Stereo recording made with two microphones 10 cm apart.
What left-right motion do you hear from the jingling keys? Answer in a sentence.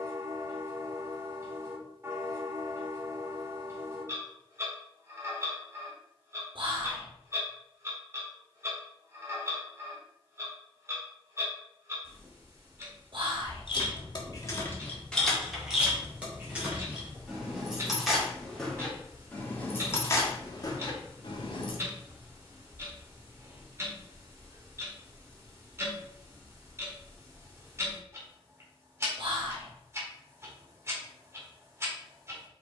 In this clip you hear the jingling keys go right and come back.